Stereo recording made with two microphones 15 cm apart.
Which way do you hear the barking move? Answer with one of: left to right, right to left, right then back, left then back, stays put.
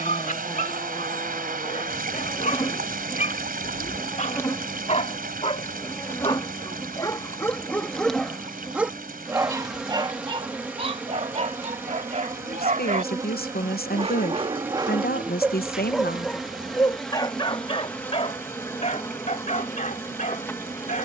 right then back.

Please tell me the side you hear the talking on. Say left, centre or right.
left.